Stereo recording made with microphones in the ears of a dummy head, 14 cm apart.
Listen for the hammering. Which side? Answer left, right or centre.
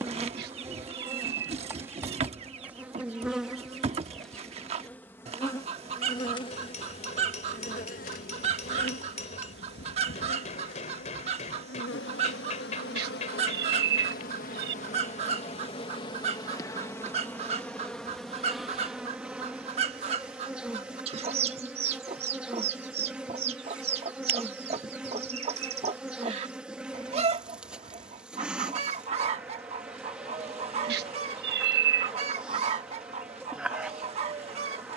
left.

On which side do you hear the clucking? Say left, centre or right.
right.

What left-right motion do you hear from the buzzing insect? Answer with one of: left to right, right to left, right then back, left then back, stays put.
left then back.